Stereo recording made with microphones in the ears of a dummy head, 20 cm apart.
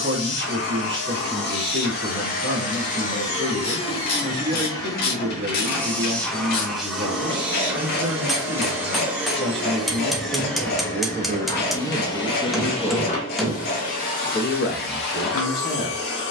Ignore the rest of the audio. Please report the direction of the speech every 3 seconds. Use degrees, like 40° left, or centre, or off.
50° right, 50° right, 50° right, 40° right, 10° left, 40° left.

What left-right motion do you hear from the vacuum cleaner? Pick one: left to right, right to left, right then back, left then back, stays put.
right then back.